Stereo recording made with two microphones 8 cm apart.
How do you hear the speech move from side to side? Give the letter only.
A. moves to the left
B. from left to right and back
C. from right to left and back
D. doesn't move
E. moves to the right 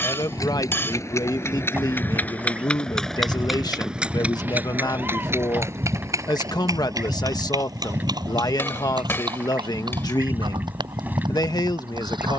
D.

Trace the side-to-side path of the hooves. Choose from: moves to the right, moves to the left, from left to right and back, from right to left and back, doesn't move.
moves to the right.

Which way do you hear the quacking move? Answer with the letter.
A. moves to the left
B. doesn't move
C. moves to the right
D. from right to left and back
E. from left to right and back
B.